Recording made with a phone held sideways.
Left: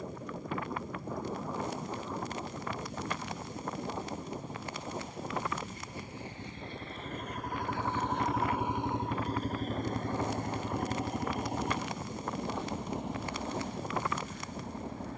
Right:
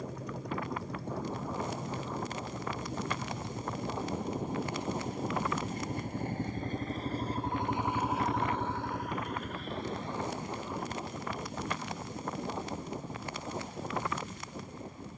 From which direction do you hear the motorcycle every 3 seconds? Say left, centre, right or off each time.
right, right, right, left, left.